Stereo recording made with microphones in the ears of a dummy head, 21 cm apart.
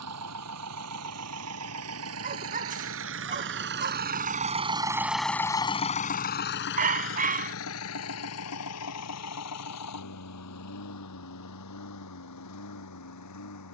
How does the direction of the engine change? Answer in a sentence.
In this clip you hear the engine travel towards the left.